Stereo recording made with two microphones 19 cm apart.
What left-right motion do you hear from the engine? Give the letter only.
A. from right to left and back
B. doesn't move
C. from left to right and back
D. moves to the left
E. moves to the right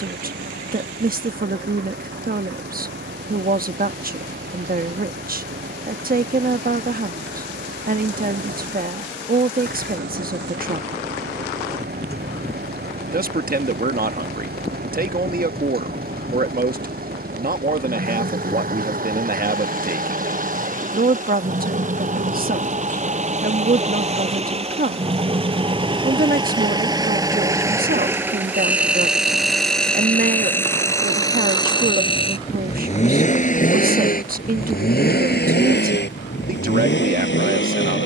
D.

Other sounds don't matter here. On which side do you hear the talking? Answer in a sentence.
In this clip you hear the talking on the right.